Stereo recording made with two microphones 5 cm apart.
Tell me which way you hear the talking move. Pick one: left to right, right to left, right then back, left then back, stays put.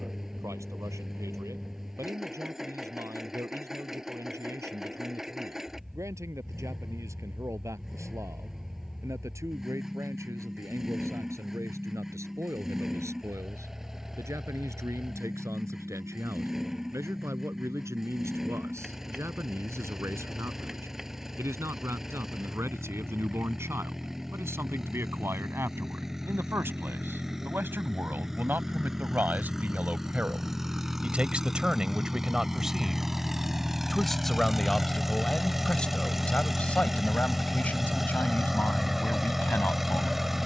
right to left.